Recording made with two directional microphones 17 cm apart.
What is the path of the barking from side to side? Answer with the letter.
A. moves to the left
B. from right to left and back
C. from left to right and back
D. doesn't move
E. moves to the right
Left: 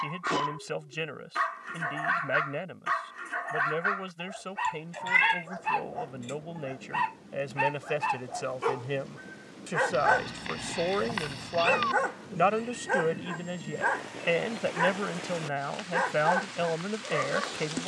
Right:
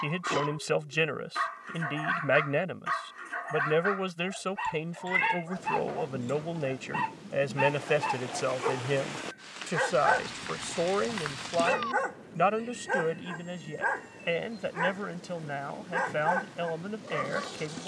D.